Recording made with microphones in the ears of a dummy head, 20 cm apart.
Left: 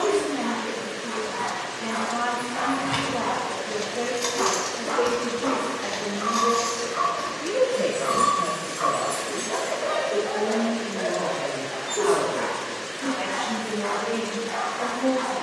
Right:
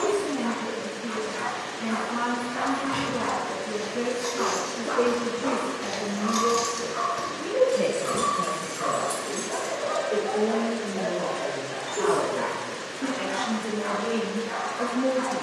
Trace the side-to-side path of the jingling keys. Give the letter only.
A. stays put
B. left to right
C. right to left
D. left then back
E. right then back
B.